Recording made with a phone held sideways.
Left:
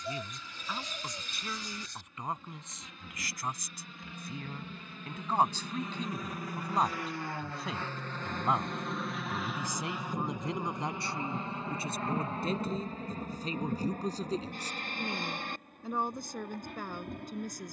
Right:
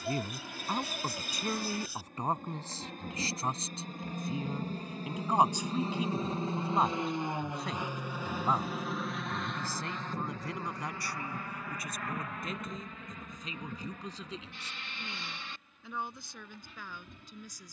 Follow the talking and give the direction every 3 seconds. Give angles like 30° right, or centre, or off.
40° right, 20° right, centre, 20° left, 40° left, 50° left.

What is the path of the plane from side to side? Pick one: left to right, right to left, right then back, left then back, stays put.
right to left.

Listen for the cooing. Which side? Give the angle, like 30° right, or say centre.
10° right.